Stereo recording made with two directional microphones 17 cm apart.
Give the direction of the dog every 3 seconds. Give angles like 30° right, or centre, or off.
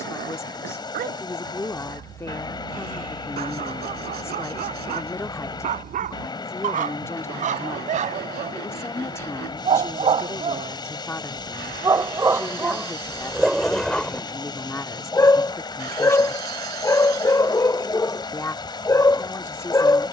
60° right, 50° right, 50° right, 30° right, 10° right, 20° left, 20° left.